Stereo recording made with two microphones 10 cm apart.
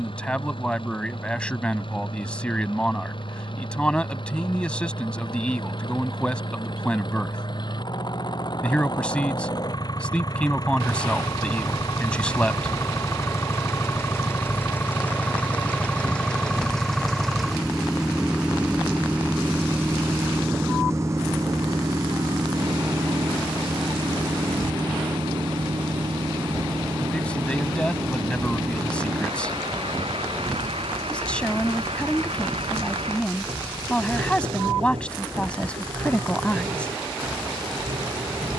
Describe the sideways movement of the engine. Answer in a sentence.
You can hear the engine go from the left side to the right.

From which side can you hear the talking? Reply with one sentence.
In this clip you hear the talking in the centre.